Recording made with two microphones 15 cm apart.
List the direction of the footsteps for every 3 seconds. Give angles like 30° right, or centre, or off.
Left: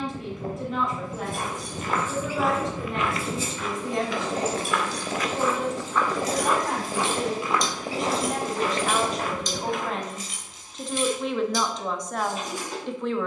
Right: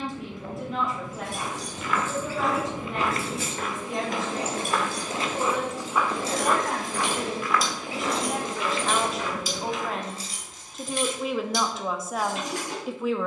20° left, 30° right, 20° left, 50° left, off.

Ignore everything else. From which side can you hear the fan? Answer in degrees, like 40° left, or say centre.
40° left.